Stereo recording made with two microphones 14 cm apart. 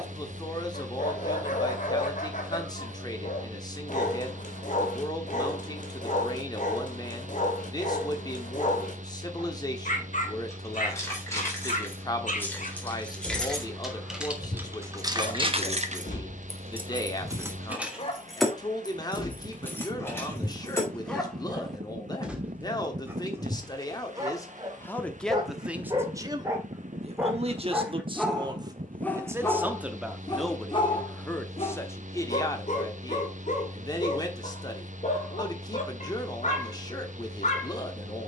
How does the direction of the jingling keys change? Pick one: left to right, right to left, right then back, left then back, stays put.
right then back.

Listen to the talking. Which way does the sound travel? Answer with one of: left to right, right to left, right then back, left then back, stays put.
right then back.